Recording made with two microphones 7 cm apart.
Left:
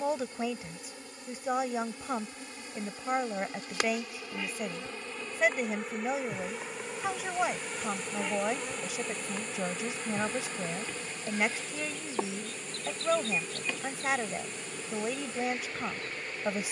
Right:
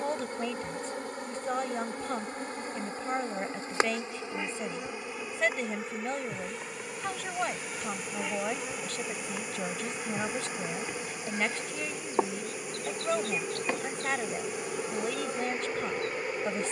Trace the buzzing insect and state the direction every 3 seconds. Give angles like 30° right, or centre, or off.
50° right, 20° right, centre, 10° right, 40° right, 50° right.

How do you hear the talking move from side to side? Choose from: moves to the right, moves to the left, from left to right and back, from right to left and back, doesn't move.
doesn't move.